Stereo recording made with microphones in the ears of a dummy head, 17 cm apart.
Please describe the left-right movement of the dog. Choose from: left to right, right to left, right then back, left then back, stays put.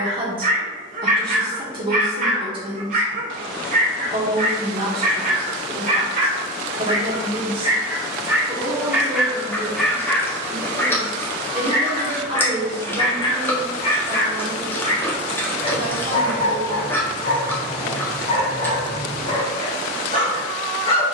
right to left.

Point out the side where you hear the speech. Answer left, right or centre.
right.